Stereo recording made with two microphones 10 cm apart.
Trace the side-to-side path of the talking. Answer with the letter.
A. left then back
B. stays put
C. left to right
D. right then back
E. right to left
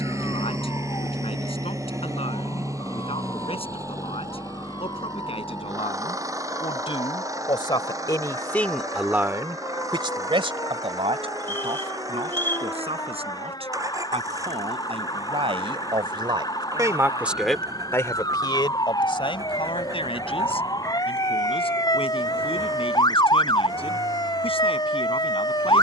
D.